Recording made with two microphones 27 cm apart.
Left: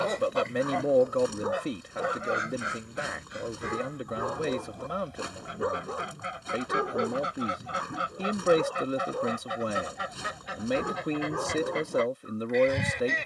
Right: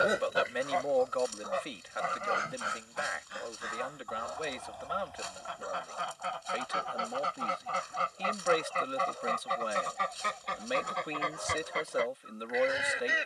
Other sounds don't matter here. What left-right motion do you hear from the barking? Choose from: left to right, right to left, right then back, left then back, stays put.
stays put.